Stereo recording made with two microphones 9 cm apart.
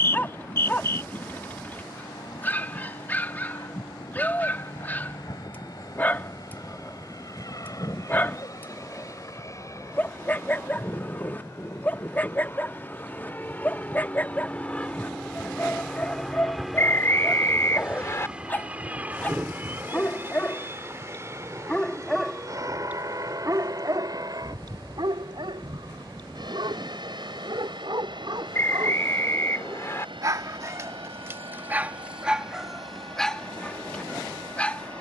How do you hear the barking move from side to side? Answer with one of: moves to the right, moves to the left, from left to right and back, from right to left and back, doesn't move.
from left to right and back.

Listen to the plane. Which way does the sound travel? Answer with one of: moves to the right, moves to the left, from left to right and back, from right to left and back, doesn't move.
moves to the right.